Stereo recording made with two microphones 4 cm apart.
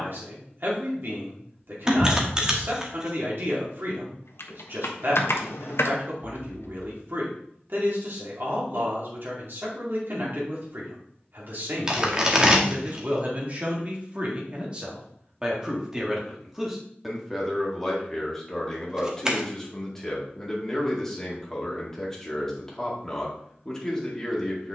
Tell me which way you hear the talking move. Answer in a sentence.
In this clip you hear the talking move from right to left.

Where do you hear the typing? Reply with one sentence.
You can hear the typing on the left.